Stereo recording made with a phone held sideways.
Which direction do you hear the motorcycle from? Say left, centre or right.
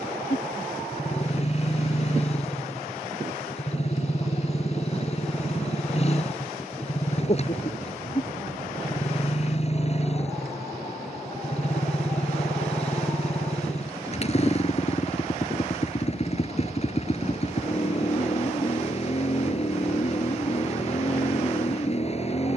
left.